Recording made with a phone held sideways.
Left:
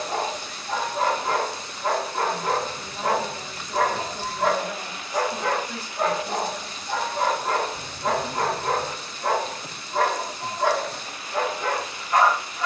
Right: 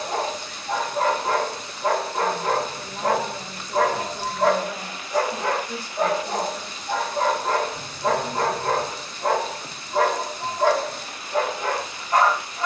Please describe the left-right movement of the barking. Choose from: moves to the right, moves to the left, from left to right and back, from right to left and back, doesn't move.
doesn't move.